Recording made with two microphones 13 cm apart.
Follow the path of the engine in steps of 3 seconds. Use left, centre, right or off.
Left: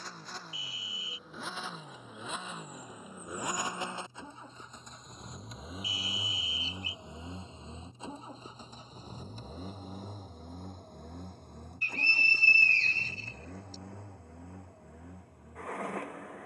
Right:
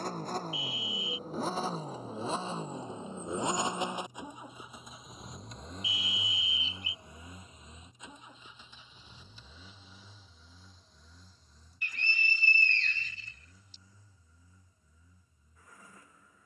right, centre, left, left, left, left.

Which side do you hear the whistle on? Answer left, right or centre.
left.